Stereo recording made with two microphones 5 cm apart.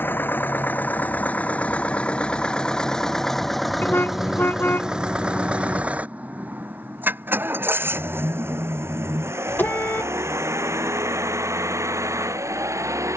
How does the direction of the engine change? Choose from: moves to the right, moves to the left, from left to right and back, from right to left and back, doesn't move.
moves to the right.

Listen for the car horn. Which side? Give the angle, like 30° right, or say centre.
40° left.